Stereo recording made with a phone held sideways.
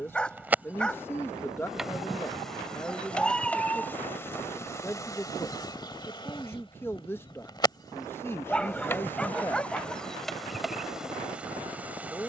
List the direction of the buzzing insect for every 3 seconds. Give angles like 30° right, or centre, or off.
centre, 20° left, 30° left, centre.